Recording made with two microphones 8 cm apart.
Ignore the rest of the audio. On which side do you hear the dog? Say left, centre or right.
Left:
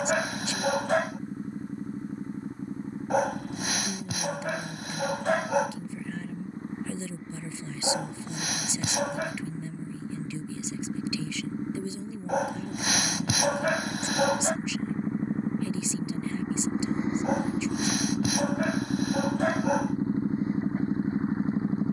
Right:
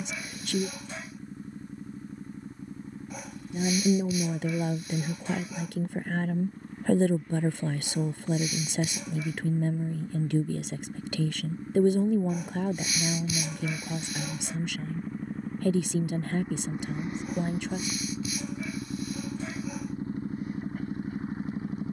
left.